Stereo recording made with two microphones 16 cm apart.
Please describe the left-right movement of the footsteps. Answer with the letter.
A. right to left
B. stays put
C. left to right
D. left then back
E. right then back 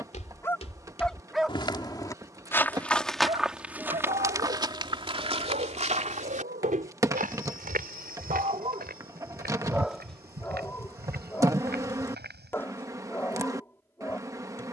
C.